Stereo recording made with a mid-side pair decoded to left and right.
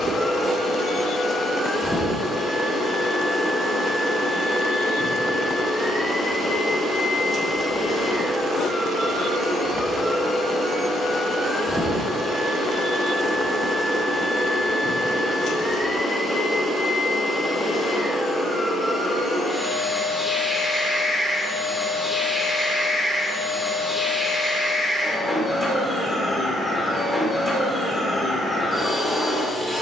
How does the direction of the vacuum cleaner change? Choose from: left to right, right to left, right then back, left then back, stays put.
stays put.